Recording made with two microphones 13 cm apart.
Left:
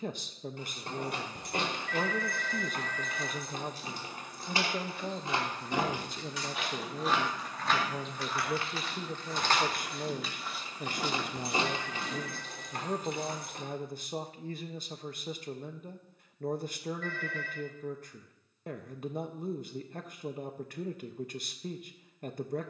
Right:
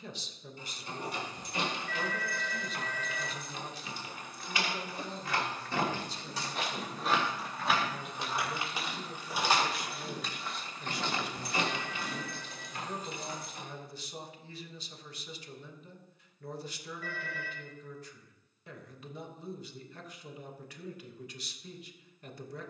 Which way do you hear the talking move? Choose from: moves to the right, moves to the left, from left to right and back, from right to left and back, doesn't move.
doesn't move.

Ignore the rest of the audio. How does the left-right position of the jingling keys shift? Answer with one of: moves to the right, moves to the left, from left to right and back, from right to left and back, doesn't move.
from left to right and back.